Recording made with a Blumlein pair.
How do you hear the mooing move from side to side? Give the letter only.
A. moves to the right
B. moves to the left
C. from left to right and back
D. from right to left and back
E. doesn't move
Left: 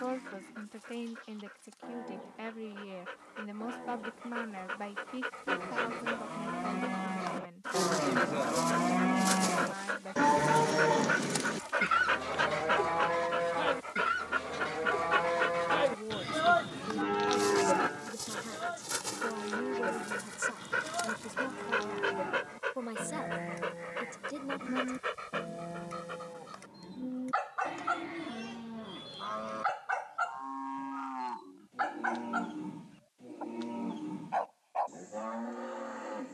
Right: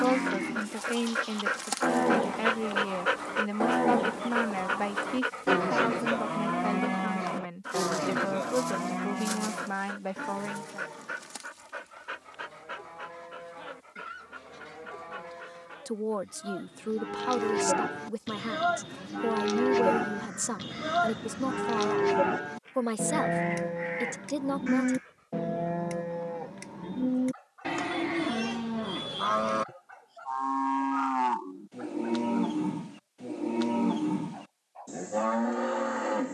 D.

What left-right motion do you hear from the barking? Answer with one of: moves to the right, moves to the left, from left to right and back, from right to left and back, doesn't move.
moves to the left.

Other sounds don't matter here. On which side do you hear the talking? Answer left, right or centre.
right.